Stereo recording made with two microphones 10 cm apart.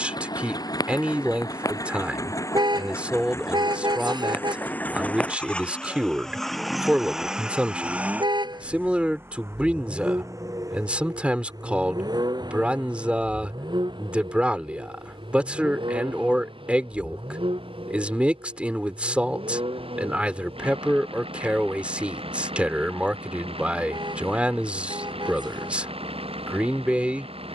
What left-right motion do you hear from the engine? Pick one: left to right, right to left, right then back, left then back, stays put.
left to right.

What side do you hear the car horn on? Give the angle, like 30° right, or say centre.
50° right.